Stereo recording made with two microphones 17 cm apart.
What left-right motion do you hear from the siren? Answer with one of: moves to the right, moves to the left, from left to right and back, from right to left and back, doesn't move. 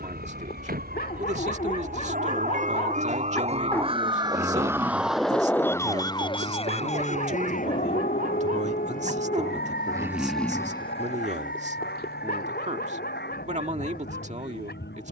moves to the left.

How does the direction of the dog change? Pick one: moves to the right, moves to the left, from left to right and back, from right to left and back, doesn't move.
from left to right and back.